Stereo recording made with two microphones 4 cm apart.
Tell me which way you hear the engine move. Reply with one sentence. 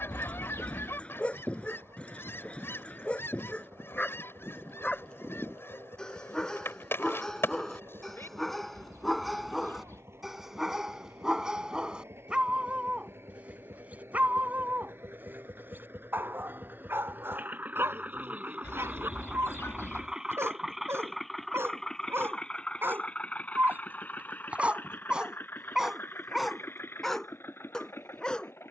You can hear the engine go from the right side to the left.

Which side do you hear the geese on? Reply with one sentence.
In this clip you hear the geese on the left.